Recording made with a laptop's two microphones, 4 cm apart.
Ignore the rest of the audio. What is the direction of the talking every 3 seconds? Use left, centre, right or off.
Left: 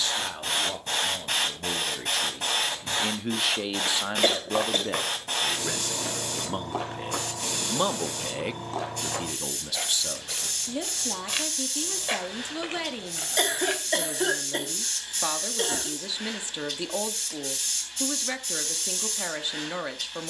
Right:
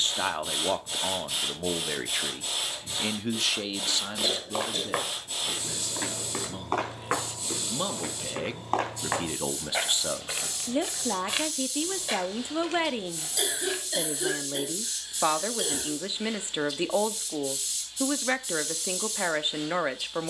right, left, left, right, right, right, right.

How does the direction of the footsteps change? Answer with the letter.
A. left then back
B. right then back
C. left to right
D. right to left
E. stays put
B.